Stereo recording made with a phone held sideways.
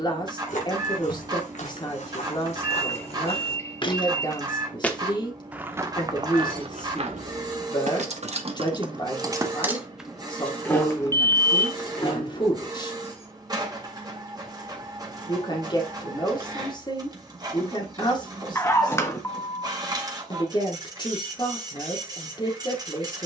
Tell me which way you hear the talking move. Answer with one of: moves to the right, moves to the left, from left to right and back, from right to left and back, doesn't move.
doesn't move.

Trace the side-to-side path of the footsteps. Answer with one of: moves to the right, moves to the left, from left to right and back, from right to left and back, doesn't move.
moves to the right.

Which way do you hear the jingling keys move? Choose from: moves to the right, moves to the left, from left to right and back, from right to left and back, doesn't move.
moves to the left.